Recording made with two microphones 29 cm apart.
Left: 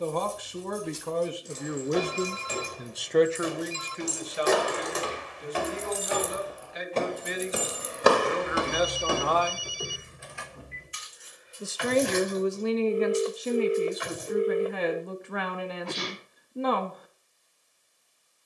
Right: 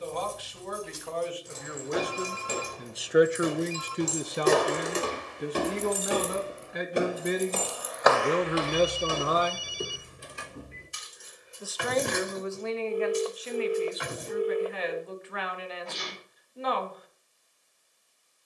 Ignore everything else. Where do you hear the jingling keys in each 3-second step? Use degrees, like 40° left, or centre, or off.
60° right, 40° right, centre, 40° right, 60° right, off.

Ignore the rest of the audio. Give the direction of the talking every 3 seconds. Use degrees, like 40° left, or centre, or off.
40° left, 40° right, 50° right, centre, 50° left, 50° left.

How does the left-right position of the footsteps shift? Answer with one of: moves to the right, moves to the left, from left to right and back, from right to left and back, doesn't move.
moves to the left.